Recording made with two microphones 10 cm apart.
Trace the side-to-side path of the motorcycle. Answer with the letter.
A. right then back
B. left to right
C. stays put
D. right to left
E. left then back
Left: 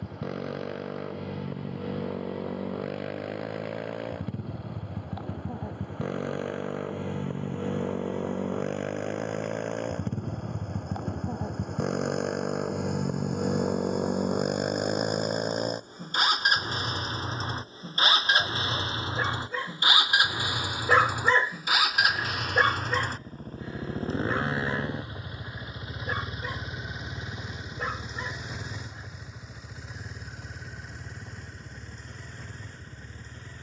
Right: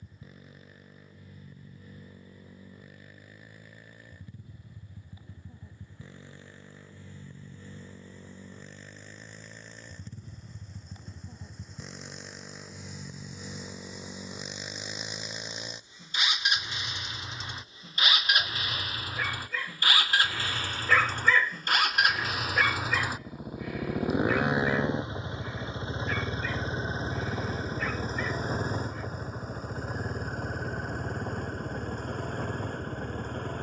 B.